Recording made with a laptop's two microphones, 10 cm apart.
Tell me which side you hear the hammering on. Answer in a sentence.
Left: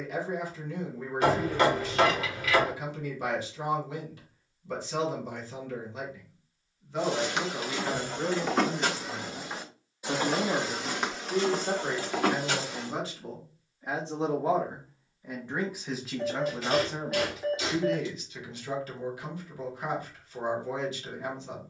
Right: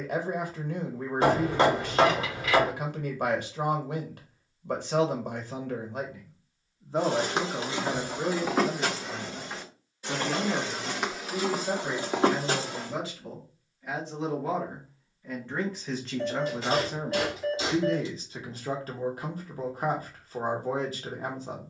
You can hear the hammering on the right.